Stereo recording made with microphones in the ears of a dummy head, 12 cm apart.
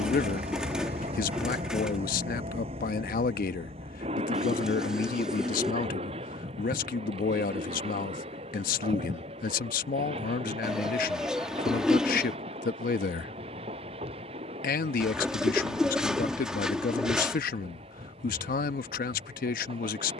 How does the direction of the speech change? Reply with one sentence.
You can hear the speech stay in one place.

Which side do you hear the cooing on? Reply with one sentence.
In this clip you hear the cooing in the centre.